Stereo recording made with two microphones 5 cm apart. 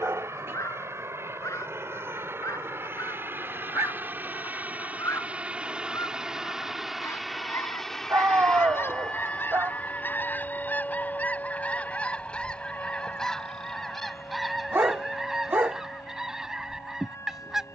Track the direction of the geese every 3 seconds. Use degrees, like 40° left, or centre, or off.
70° left, 70° left, 60° left, 30° left, 10° left, 10° right.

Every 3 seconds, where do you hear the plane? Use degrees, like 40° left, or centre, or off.
60° right, 30° right, centre, 30° left, 40° left, 50° left.